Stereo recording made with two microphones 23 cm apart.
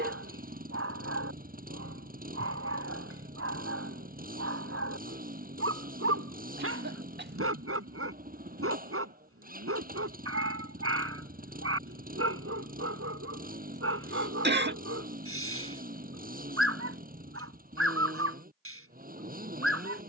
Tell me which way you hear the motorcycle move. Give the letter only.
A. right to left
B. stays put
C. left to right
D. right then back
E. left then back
B.